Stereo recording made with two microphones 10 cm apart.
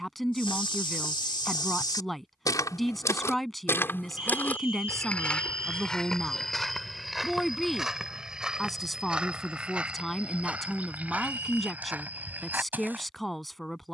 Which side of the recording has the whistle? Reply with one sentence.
In this clip you hear the whistle on the left.